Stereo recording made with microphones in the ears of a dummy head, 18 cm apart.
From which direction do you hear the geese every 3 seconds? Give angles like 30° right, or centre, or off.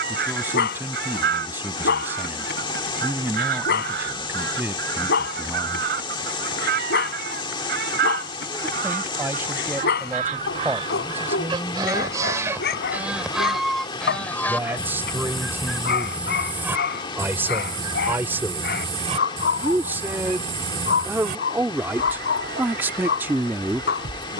50° right, 50° right, 50° right, 30° right, centre, 10° right, 40° right, 50° right.